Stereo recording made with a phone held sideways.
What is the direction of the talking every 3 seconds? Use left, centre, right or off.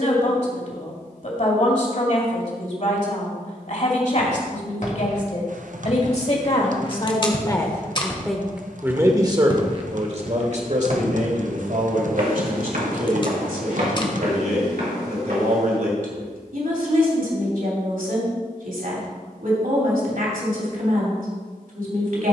left, left, left, right, right, right, right, right.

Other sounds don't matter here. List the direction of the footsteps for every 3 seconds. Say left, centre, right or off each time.
off, left, left, right, right, right, off, off.